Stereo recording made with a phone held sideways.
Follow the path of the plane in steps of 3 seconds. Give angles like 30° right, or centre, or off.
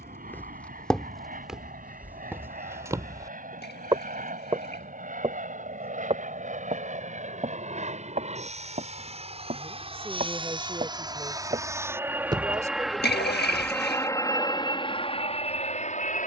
60° right, 60° right, 50° right, 30° right, 10° left, 40° left.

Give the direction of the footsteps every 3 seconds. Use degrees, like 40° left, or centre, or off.
centre, 30° right, 40° right, 40° right, 20° right, off.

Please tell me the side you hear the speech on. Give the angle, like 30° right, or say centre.
20° right.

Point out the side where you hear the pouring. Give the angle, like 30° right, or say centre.
80° left.